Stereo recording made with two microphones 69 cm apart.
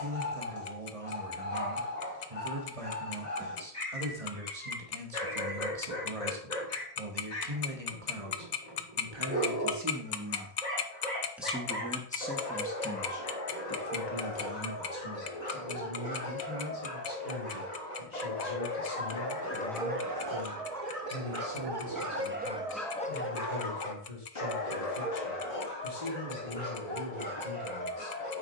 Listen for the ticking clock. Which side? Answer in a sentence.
You can hear the ticking clock on the left.